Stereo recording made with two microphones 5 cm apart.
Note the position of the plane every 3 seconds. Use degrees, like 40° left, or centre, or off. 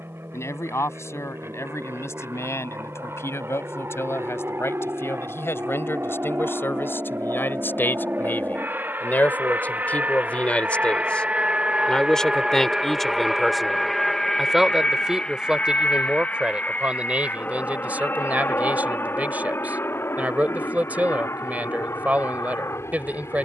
70° right, 60° right, 50° right, 30° right, centre, 30° left, 50° left, 60° left.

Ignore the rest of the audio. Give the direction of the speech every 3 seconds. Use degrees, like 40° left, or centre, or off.
70° left, 60° left, 50° left, 30° left, centre, 20° right, 30° right, 30° right.